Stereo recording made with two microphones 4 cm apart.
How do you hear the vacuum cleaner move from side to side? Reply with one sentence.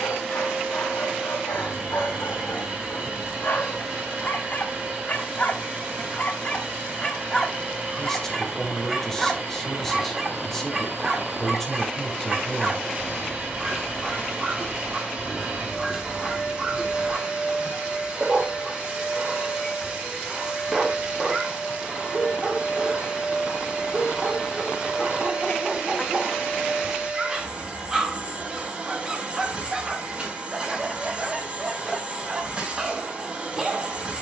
In this clip you hear the vacuum cleaner stay put.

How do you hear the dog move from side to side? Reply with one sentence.
You can hear the dog go from the left side to the right.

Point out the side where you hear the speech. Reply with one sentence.
In this clip you hear the speech in the centre.